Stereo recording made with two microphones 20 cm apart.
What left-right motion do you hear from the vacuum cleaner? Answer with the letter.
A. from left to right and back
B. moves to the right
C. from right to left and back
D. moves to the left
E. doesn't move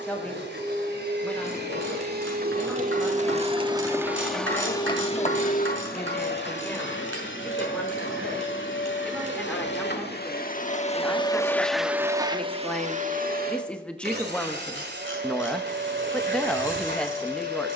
C.